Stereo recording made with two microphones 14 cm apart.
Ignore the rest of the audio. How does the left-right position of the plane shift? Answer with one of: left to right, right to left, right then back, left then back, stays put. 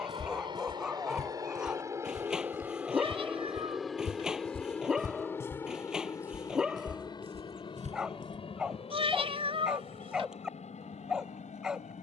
right to left.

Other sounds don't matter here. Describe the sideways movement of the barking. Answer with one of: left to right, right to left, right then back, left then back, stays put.
stays put.